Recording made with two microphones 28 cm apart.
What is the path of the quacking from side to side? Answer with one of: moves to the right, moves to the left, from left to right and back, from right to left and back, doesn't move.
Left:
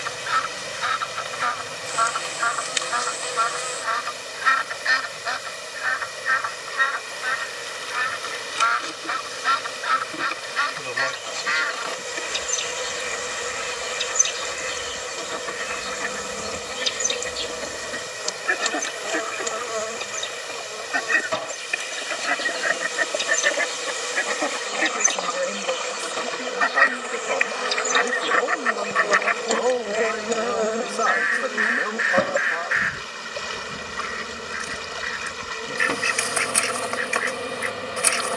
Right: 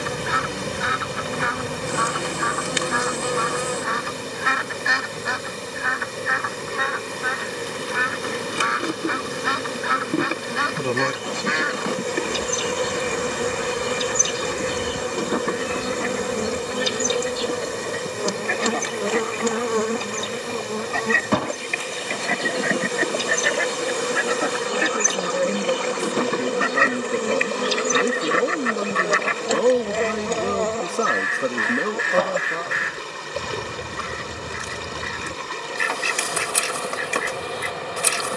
from right to left and back.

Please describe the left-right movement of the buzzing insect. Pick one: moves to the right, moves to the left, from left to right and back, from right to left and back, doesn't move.
moves to the left.